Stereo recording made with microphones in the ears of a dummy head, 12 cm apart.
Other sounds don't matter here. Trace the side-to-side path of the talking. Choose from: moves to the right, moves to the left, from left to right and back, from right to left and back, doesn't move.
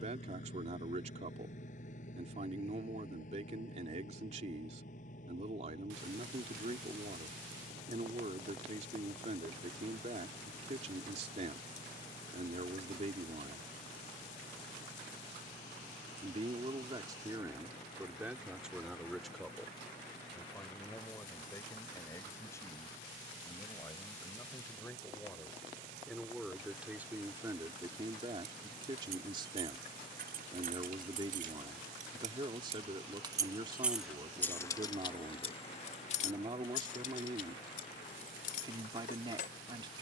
from right to left and back.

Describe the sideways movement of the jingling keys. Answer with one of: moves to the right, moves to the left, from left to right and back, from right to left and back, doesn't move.
moves to the left.